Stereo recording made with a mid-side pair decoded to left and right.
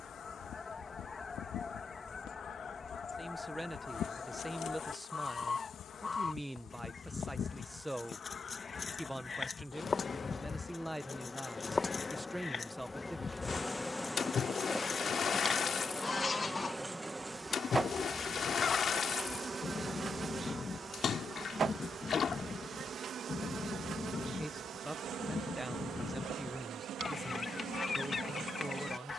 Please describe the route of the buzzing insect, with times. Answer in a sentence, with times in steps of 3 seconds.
You can hear the buzzing insect on the left from 0 s, in the centre from 12 s and on the right from 18 s.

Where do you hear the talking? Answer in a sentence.
You can hear the talking in the centre.